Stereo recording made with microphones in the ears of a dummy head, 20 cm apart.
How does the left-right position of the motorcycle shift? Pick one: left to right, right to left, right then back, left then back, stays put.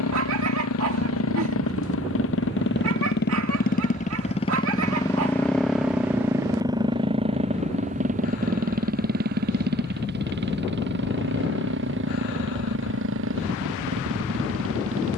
left to right.